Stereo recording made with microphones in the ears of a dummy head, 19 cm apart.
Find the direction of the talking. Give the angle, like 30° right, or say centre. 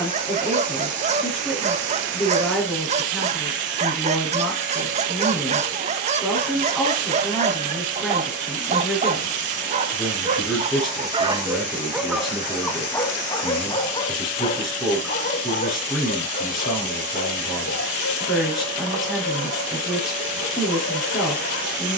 centre.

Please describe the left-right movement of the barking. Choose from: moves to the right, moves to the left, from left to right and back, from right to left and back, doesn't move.
moves to the left.